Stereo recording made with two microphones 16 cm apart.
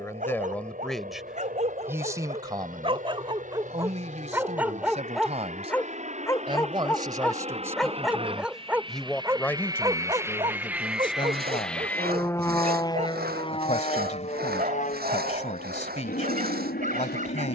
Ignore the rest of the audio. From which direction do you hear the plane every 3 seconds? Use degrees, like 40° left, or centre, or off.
70° right, 60° right, 40° right, 10° right, 30° left, 60° left.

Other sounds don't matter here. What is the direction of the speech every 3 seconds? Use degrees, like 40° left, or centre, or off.
10° right, 40° right, 20° right, 20° left, 50° left, 50° left.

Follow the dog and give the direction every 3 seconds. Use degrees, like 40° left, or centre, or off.
50° right, 10° right, 10° left, 30° right, 50° right, 50° right.